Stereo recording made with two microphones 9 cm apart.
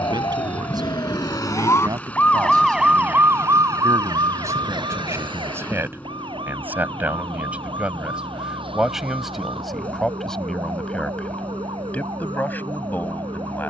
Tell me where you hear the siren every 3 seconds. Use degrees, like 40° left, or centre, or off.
40° left, 50° right, 70° right, 80° right, 80° right.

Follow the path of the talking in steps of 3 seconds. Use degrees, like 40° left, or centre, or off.
50° right, 30° right, 10° right, 10° left, 20° left.